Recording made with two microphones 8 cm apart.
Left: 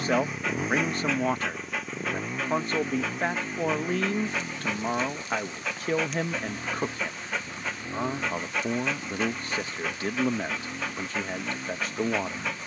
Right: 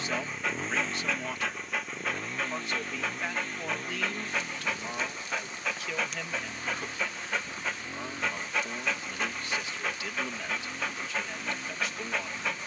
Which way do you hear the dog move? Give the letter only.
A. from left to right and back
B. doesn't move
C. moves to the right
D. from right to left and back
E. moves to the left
B.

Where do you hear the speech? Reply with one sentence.
In this clip you hear the speech on the left.